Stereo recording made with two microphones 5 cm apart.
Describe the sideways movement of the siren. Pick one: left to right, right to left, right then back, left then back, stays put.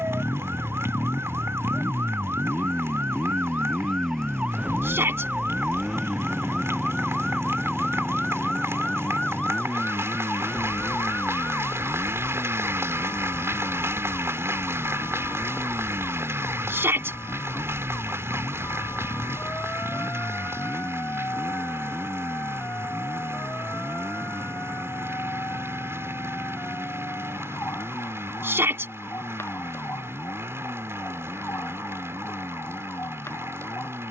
right to left.